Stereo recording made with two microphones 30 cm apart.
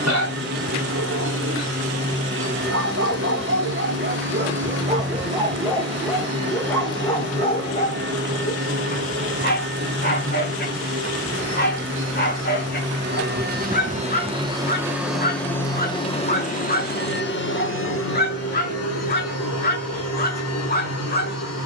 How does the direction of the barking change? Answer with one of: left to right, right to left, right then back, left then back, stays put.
right to left.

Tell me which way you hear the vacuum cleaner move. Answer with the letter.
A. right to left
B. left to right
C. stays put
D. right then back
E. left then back
A.